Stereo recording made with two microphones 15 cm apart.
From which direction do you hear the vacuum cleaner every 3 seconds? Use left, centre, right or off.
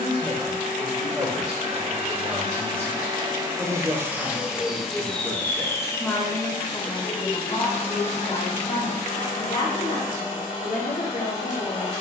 right, centre, left, left.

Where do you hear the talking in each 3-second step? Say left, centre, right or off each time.
right, centre, left, left.